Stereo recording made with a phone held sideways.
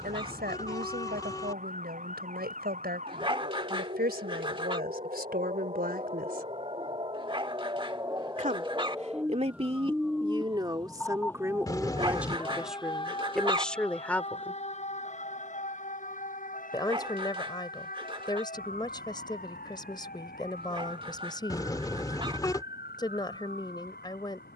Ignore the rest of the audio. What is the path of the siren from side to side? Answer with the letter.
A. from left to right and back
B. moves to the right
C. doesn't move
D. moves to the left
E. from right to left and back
D.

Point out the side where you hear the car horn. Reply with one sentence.
You can hear the car horn on the left.